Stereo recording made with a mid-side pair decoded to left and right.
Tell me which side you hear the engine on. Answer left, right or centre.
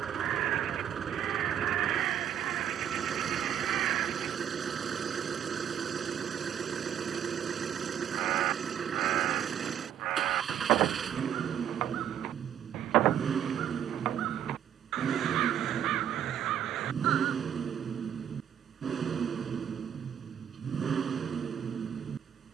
right.